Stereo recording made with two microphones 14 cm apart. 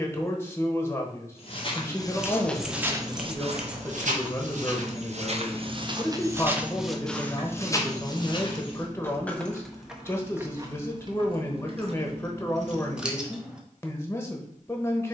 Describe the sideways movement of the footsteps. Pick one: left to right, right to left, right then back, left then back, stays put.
right then back.